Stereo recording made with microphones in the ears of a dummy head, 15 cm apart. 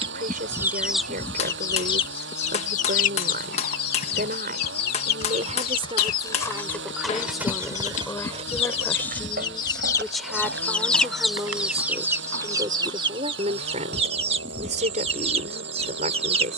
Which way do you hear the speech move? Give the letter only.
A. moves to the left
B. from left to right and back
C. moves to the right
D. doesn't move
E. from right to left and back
E.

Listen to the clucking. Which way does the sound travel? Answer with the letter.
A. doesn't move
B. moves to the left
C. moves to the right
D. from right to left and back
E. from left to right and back
D.